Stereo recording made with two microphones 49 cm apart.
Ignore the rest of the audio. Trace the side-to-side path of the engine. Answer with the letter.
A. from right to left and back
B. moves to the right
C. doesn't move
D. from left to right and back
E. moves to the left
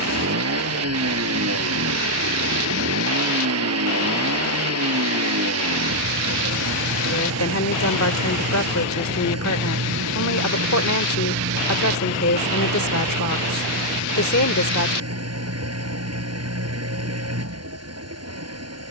C.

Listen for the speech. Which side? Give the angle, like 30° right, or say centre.
30° left.